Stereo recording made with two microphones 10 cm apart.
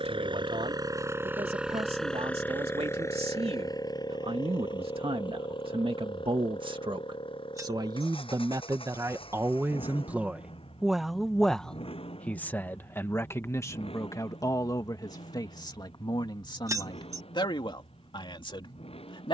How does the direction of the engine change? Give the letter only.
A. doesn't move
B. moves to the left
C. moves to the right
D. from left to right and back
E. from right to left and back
B.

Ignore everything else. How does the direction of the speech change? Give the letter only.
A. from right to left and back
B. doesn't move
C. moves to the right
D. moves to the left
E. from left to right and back
D.